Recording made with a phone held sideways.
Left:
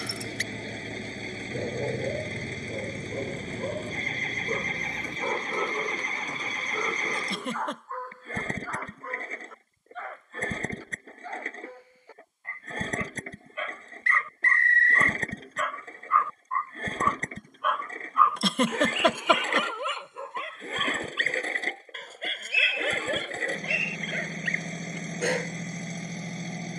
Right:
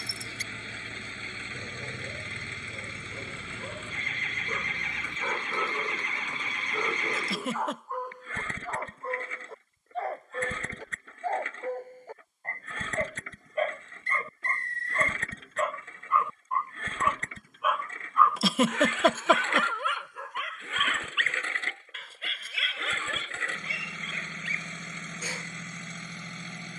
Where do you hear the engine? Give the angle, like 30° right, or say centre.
30° left.